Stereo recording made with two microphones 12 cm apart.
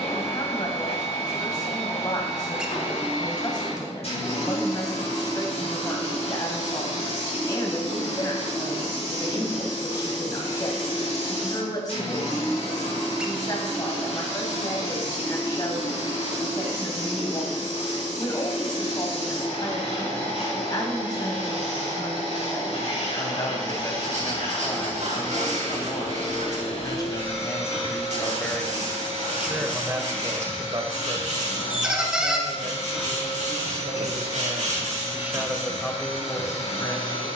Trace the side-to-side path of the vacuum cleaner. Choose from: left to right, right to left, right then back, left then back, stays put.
stays put.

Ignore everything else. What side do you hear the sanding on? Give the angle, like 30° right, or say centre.
70° right.